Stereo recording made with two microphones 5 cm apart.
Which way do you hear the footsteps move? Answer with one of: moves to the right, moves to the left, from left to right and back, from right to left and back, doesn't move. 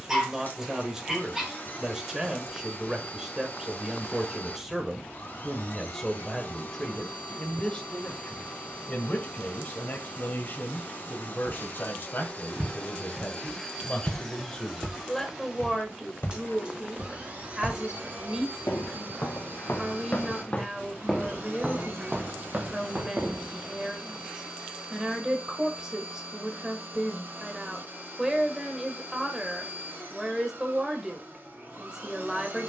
from right to left and back.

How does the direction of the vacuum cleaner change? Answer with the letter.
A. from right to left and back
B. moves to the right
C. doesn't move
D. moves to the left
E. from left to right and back
B.